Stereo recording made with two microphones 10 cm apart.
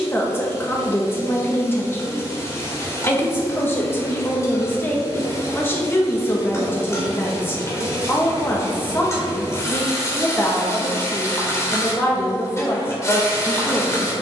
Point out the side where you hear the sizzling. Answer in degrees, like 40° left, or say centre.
30° left.